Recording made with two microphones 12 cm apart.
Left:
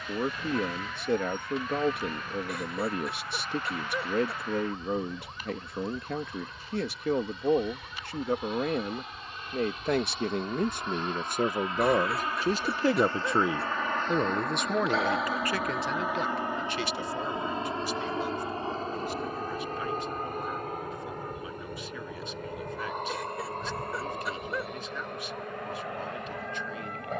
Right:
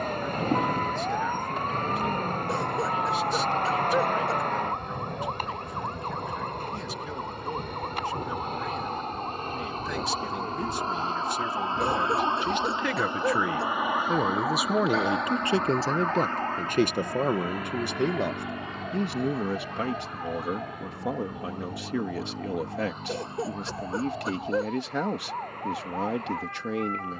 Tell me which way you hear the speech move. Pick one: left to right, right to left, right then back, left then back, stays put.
left to right.